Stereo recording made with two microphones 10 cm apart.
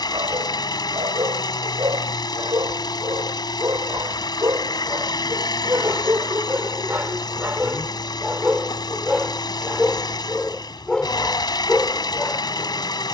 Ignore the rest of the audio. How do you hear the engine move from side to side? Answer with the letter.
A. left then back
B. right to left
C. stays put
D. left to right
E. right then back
C.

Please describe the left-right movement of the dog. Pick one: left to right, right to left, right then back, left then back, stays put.
right to left.